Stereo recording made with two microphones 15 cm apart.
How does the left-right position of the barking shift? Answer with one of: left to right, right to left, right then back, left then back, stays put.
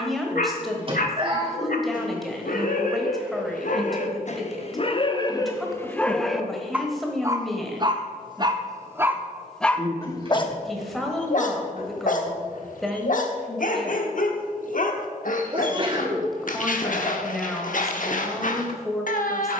right then back.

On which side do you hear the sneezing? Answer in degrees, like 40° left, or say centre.
40° right.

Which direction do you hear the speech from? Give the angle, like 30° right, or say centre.
centre.